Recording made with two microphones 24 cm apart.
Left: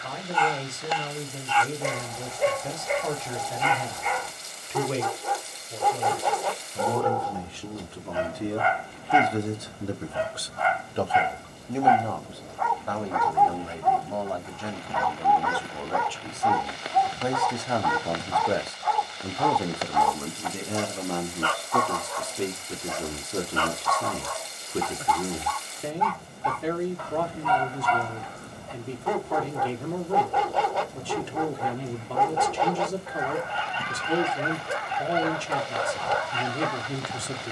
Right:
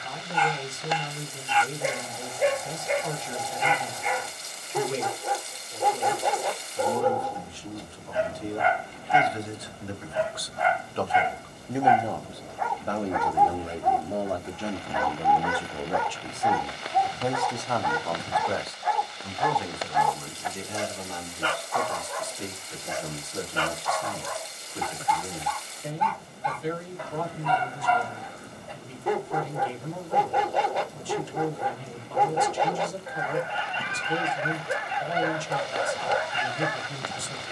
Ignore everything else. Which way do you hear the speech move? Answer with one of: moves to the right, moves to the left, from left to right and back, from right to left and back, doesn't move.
from left to right and back.